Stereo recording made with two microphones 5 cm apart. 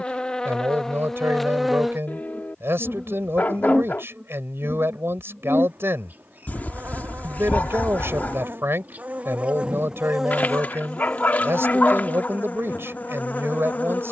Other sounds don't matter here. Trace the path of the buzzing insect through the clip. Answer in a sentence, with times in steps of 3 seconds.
In this clip you hear the buzzing insect in the centre from 0 s, on the right from 3 s, in the centre from 9 s and on the left from 12 s.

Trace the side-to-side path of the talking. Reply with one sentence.
You can hear the talking stay in one place.